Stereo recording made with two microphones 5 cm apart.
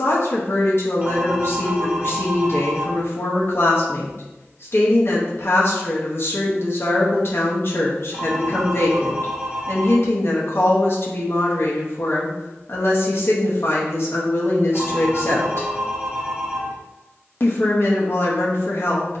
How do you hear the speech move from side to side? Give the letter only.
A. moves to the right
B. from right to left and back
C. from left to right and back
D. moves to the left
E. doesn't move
E.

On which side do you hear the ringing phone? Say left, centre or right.
right.